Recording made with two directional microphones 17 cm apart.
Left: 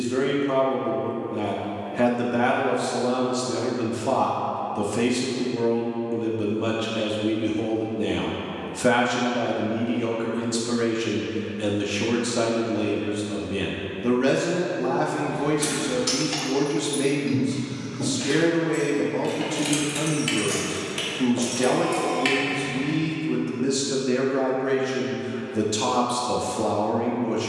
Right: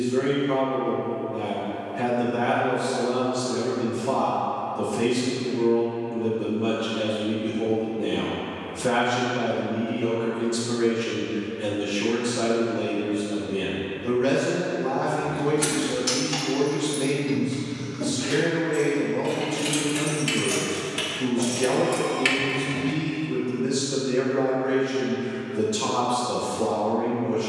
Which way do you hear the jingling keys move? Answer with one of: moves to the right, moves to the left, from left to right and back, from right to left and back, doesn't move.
from right to left and back.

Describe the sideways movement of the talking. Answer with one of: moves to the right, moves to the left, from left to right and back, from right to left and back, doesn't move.
doesn't move.